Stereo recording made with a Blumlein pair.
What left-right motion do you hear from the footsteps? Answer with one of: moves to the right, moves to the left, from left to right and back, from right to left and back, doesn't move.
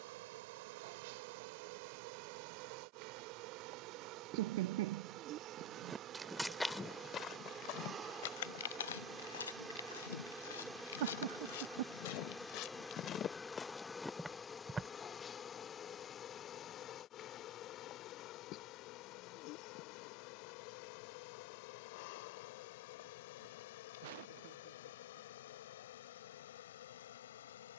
from right to left and back.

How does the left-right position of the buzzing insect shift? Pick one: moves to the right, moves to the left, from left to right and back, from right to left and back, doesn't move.
moves to the left.